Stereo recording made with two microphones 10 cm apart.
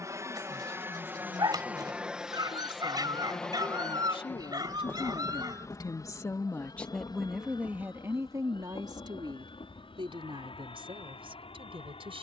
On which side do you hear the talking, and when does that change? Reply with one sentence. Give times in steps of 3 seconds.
In this clip you hear the talking on the left from 0 s, in the centre from 6 s and on the right from 9 s.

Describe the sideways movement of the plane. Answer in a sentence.
You can hear the plane move from right to left.